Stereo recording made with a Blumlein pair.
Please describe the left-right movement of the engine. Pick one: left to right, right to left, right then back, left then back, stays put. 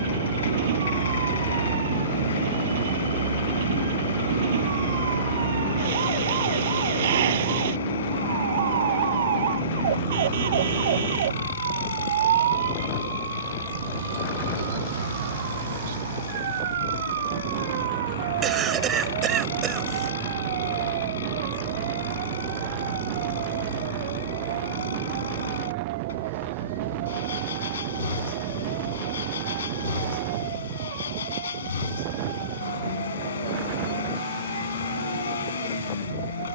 stays put.